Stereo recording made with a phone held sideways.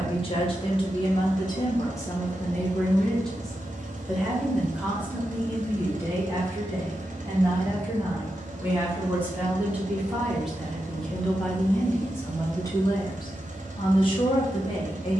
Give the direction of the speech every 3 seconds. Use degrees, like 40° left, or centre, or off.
30° left, 10° right, 20° right, centre, 30° left.